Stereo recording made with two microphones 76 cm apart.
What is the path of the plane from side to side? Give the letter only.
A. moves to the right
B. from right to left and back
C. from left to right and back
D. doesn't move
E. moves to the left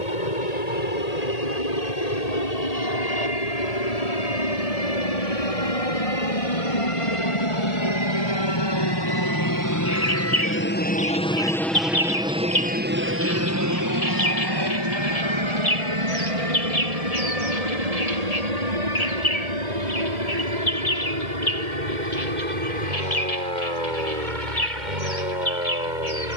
A.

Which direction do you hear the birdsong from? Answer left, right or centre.
left.